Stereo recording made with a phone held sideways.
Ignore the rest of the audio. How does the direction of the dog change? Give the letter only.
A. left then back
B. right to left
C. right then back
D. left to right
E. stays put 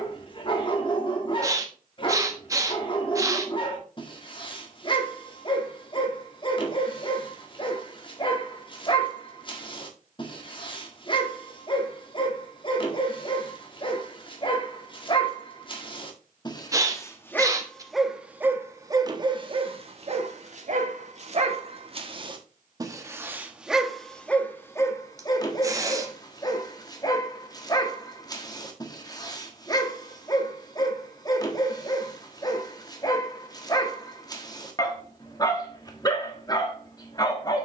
C.